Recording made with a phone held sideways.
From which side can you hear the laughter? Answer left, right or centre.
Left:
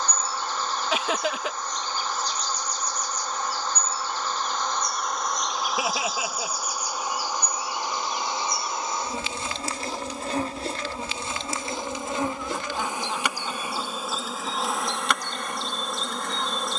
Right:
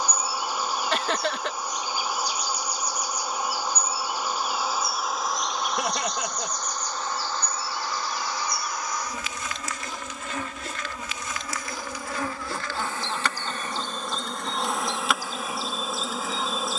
centre.